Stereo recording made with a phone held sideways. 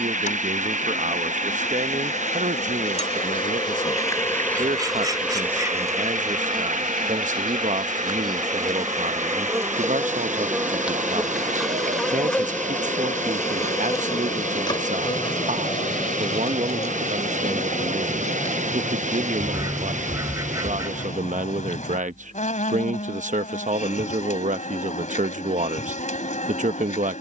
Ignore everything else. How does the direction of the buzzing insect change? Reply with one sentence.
In this clip you hear the buzzing insect move from left to right and back again.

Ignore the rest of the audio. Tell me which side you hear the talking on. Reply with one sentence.
You can hear the talking on the right.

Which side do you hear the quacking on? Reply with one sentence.
You can hear the quacking on the right.